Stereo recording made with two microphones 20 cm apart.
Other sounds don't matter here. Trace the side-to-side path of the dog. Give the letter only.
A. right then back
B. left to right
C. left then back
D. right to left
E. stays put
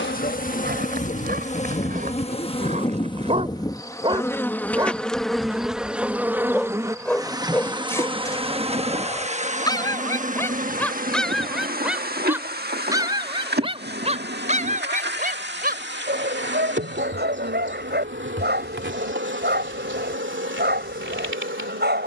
C.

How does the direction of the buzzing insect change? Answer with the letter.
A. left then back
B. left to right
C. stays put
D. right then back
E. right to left
B.